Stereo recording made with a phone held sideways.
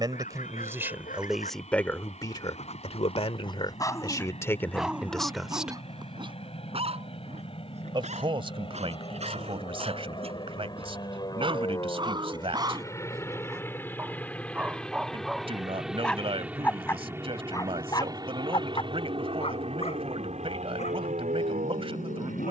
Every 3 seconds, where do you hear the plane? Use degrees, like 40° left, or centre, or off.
50° left, 50° left, 40° left, 30° left, 20° left, 10° right, 40° right, 50° right.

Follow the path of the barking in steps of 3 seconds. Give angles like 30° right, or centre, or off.
60° left, 10° left, 40° right, 40° right, 20° right, 10° left, 40° left, 60° left.